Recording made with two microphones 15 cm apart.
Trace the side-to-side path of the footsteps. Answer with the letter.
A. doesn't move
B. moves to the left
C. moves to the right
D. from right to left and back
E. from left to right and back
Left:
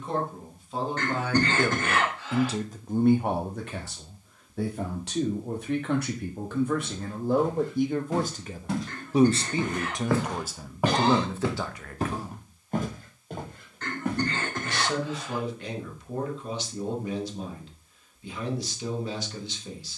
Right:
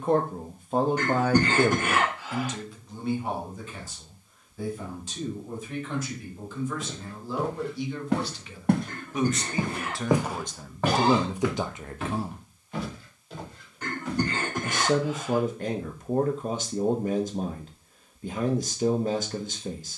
B.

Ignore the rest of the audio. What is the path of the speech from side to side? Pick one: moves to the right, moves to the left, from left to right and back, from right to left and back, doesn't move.
from right to left and back.